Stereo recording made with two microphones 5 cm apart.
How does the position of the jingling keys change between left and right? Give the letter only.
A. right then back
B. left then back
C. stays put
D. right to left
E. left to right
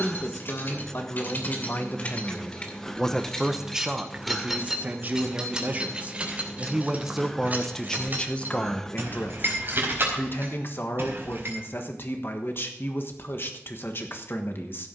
E.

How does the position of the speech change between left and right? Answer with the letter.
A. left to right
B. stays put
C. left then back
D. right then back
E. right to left
D.